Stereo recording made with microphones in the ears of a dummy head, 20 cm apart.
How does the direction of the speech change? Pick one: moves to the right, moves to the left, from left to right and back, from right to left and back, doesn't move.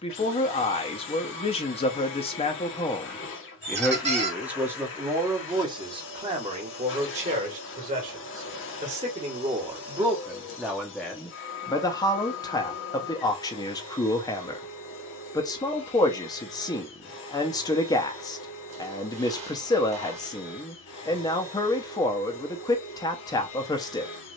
from left to right and back.